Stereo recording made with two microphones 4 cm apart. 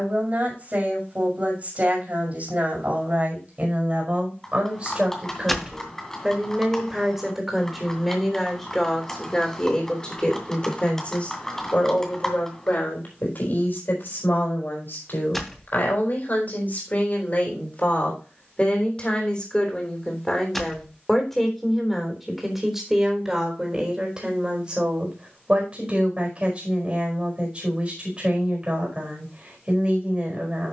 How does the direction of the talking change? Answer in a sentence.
You can hear the talking go left and come back.